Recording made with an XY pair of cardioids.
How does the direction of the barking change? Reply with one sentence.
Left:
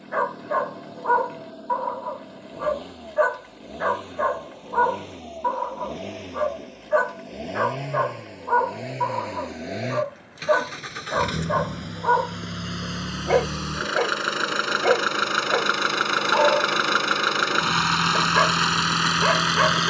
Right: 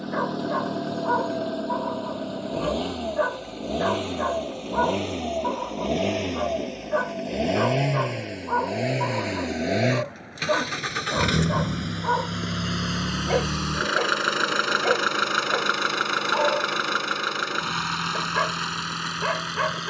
In this clip you hear the barking stay put.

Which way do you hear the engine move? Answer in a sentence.
In this clip you hear the engine move from right to left.